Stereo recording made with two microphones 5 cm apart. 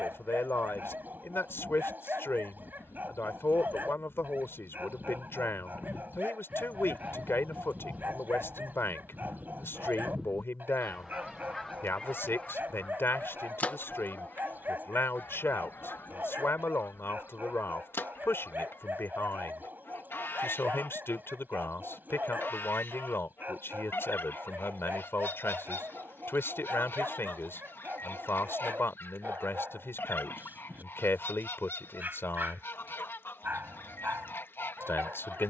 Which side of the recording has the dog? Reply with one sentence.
In this clip you hear the dog on the right.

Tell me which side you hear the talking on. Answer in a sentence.
You can hear the talking on the left.